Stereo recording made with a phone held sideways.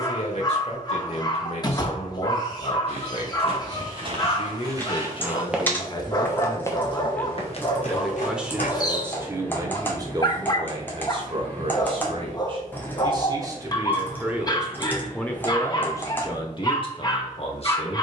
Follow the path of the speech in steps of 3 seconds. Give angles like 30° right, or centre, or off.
50° left, 40° left, 10° left, 30° right, 20° right, 30° left.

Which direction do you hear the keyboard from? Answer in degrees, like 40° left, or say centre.
10° left.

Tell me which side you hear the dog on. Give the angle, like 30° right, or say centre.
30° left.